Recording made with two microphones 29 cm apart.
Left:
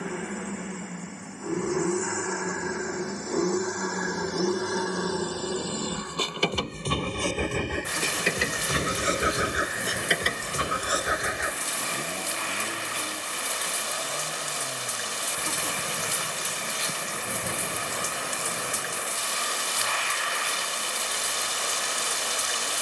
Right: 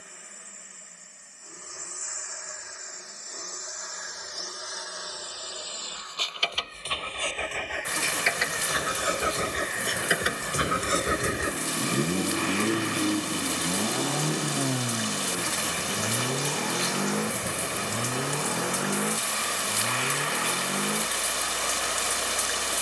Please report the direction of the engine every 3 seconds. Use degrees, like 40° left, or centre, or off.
70° left, 70° left, 50° left, 10° right, 60° right, 80° right, 80° right, 80° right.